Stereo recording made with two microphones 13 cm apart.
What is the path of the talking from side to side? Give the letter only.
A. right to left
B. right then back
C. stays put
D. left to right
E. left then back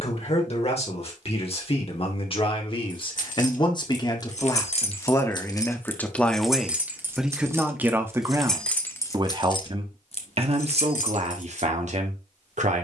D.